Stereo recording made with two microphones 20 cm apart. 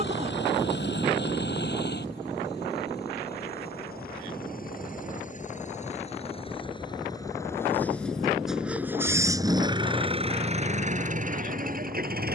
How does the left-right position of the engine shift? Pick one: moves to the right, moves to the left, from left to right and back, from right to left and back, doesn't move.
moves to the right.